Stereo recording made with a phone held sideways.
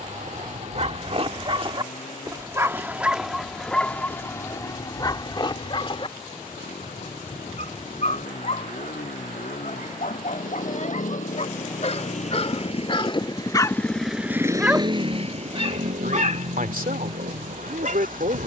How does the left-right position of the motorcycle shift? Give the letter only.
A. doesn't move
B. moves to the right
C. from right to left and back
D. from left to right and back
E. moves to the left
B.